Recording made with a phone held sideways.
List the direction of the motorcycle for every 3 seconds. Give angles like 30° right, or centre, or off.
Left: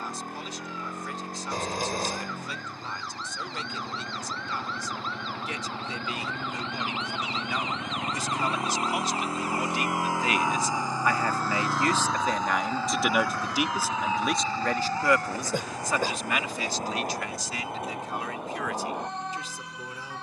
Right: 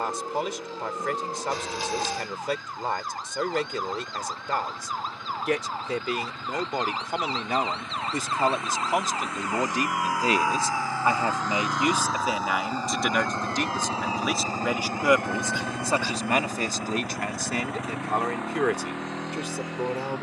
60° left, 50° left, 40° left, 20° left, 20° right, 60° right, 80° right.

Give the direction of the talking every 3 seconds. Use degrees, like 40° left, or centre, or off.
70° right, 70° right, 60° right, 30° right, centre, 40° right, 70° right.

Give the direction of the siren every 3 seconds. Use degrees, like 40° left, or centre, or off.
50° right, 50° right, 40° right, 20° right, 20° left, 50° left, 70° left.